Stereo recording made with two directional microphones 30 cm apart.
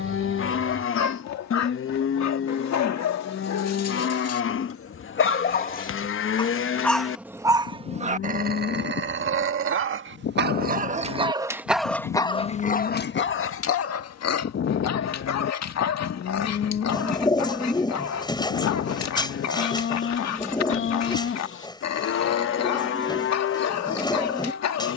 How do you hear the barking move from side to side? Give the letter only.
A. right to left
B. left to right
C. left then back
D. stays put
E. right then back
E.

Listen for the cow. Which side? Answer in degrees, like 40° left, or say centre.
40° left.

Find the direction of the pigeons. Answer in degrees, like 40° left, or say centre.
10° left.